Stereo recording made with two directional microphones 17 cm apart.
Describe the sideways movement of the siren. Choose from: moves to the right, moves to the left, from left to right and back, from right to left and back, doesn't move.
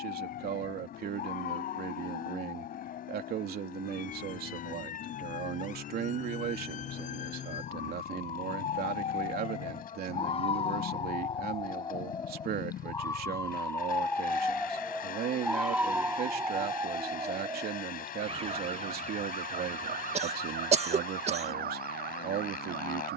moves to the right.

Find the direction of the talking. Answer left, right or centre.
right.